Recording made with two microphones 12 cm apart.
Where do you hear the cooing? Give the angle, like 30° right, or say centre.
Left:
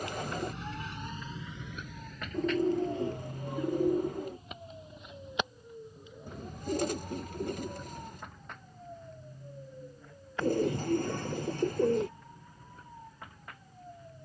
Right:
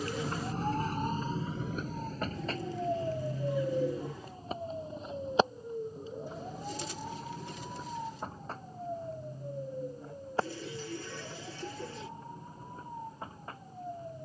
50° left.